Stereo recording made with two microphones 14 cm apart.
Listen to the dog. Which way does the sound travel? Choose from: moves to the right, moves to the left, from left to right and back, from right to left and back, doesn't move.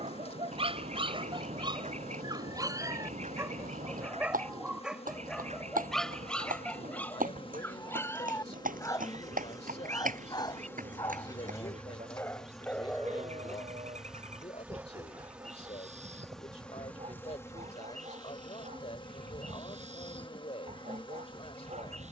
from right to left and back.